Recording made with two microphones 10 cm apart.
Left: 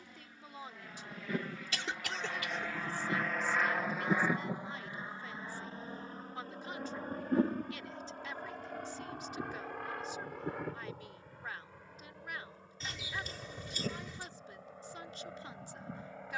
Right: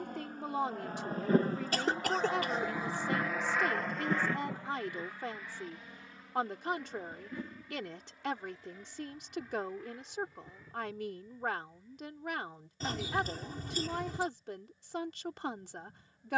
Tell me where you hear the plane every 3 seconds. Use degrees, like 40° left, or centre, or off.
40° right, 10° left, 40° left, 60° left, 60° left, 60° left.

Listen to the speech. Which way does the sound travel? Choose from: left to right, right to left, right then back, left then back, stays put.
stays put.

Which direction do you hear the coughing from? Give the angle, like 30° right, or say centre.
50° right.